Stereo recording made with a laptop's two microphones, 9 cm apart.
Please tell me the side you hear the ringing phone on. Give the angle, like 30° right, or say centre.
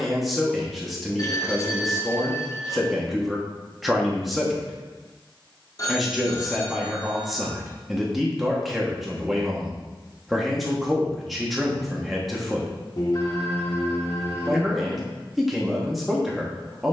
40° left.